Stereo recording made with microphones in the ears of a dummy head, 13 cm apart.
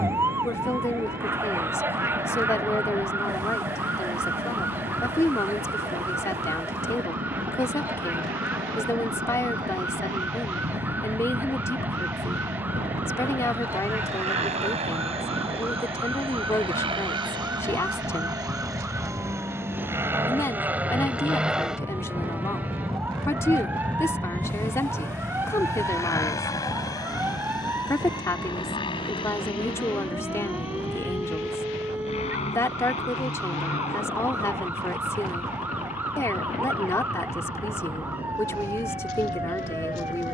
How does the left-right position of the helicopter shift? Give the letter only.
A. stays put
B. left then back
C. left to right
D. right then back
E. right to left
E.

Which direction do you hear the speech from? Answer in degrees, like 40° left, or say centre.
20° left.